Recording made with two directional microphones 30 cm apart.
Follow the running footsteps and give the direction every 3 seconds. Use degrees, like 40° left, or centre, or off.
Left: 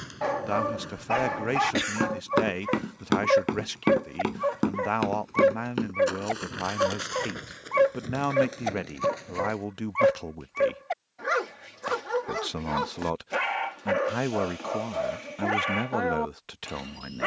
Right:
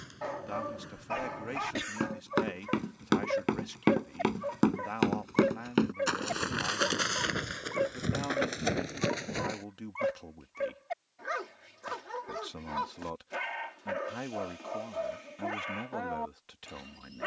40° left, centre, 40° right, 50° right, off, off.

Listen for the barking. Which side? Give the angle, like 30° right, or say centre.
60° left.